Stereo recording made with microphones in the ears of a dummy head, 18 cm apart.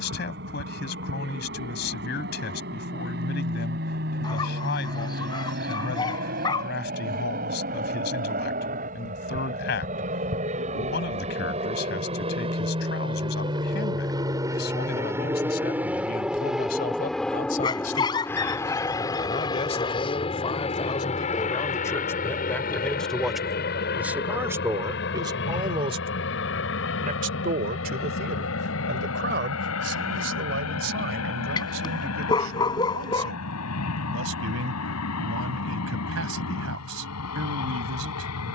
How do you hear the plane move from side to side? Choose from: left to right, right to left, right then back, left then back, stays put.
right to left.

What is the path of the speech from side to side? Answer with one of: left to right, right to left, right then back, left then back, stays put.
left to right.